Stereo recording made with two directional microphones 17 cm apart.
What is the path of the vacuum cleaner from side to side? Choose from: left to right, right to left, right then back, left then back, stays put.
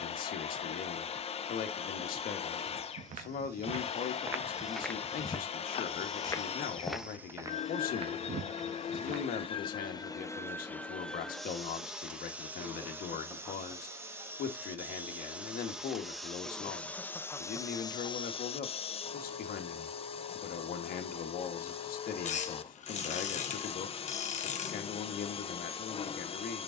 right then back.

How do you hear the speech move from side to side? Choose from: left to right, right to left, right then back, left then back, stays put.
stays put.